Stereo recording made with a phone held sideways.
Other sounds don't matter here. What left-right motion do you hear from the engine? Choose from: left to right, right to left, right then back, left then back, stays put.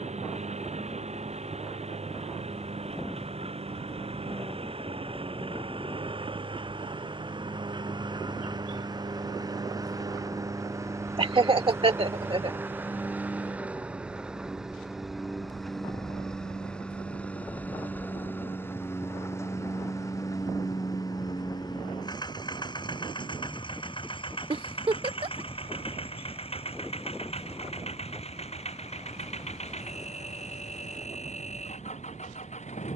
right to left.